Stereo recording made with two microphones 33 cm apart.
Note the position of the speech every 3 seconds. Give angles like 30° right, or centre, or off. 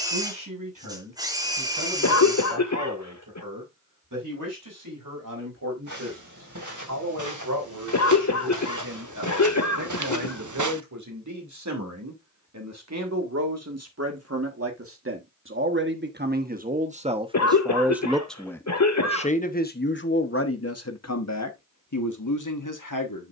70° right, 70° right, 60° right, 60° right, 50° right, 20° right, 30° left, 60° left.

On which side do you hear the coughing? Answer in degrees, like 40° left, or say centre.
50° left.